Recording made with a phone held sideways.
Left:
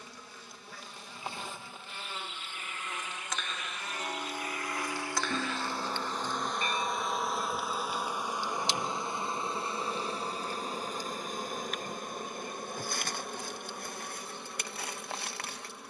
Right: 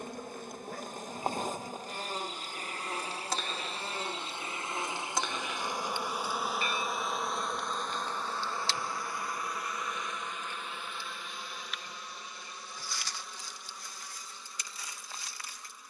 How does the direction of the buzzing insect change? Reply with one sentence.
You can hear the buzzing insect travel towards the left.